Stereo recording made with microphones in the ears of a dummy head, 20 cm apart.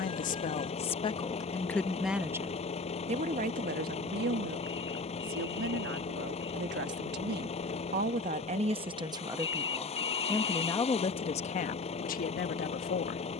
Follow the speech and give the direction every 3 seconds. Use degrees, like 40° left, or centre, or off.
20° left, 50° right, 50° right, 10° left, 40° left.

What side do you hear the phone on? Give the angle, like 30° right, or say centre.
20° left.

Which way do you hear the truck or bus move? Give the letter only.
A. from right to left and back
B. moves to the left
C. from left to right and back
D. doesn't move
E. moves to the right
D.